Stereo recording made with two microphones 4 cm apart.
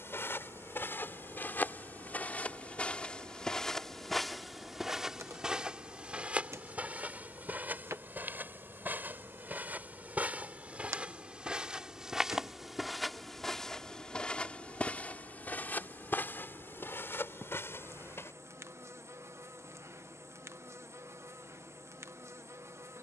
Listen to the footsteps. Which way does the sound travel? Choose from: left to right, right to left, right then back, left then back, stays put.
right then back.